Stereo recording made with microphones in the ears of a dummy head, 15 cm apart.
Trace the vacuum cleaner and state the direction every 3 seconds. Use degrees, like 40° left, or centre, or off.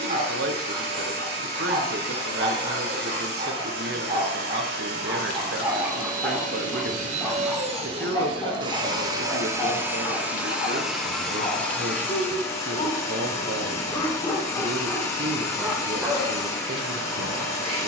70° right, 70° right, 40° right, 10° right, 20° left, 20° left.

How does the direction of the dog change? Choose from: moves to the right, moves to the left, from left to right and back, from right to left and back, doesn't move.
from right to left and back.